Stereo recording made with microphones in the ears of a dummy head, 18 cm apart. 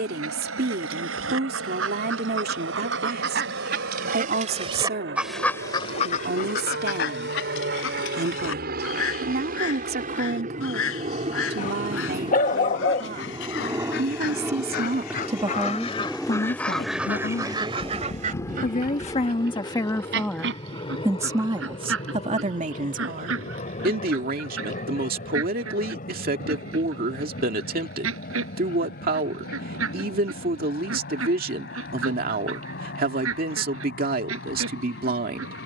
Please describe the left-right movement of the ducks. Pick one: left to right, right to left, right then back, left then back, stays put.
left then back.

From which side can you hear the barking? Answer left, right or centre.
left.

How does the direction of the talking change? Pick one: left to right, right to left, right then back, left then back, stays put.
left then back.